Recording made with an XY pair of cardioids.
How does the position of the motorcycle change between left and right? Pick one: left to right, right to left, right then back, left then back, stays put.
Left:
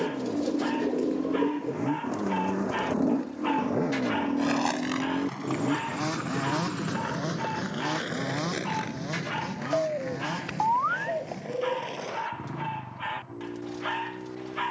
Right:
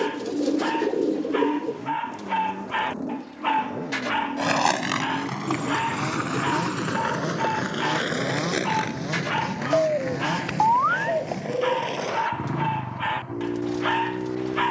left to right.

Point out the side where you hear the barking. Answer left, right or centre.
right.